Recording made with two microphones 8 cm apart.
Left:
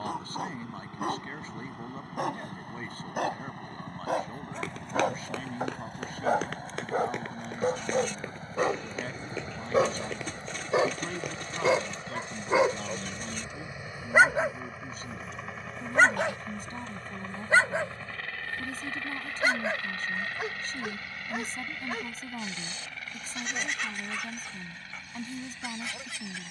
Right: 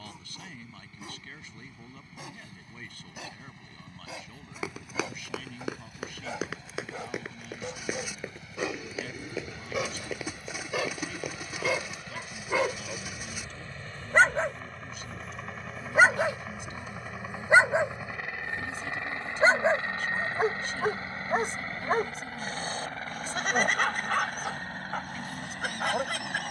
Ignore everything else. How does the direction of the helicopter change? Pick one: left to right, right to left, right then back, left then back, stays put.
left to right.